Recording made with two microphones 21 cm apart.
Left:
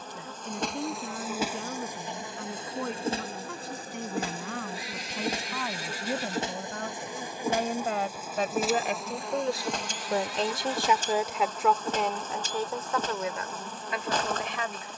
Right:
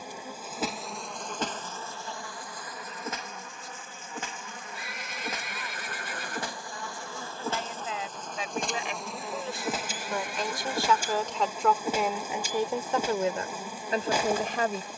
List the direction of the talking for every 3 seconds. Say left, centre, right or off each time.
left, left, left, left, right.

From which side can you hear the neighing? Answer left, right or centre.
right.